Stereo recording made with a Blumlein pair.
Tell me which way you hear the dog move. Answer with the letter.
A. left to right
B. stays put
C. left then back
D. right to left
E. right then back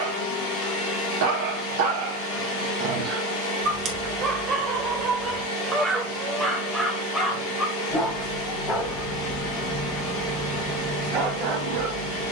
C.